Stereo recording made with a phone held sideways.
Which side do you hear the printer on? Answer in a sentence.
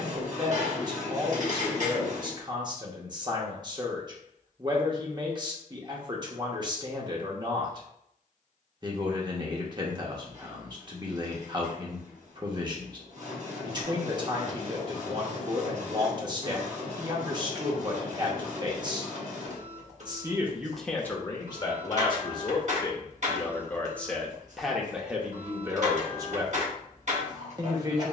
In this clip you hear the printer on the right.